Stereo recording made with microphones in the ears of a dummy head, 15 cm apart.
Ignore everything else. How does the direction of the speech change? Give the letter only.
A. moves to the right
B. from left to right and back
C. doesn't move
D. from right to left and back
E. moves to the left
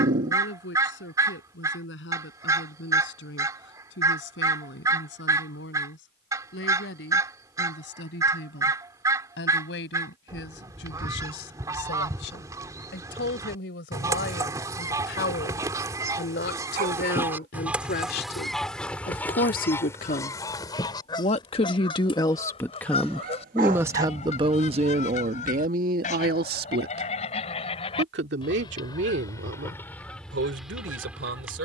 A.